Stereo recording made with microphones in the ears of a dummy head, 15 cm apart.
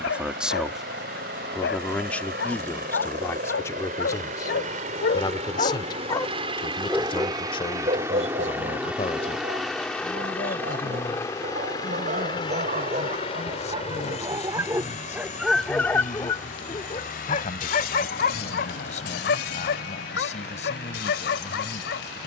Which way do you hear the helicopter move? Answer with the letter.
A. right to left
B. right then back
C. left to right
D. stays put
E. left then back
A.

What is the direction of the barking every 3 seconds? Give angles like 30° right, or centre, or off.
80° left, 60° left, 30° right, 50° right, 30° right, 20° left, 70° left, 70° left.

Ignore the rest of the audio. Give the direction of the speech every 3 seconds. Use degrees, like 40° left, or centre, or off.
centre, 20° left, 30° left, 40° left, 40° left, 40° left, 40° left, 40° left.